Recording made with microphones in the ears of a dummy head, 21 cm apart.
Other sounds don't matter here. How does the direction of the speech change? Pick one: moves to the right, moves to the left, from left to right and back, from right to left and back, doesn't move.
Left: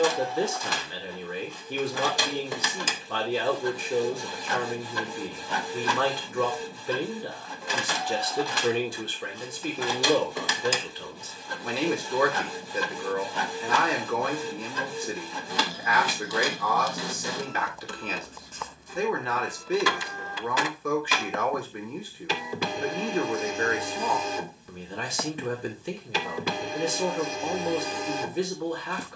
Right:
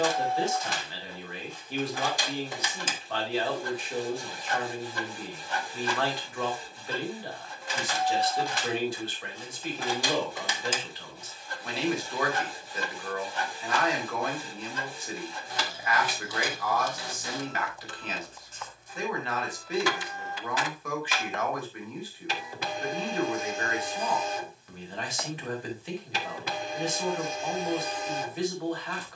doesn't move.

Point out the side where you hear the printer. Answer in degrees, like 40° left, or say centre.
60° left.